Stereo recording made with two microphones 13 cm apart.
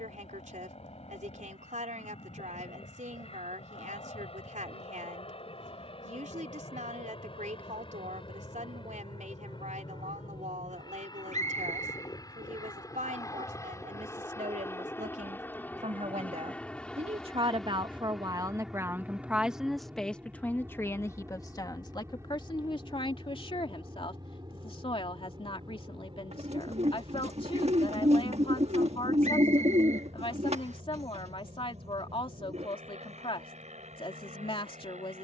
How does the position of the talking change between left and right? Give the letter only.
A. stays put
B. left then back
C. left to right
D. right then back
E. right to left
E.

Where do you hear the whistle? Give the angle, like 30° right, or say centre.
70° right.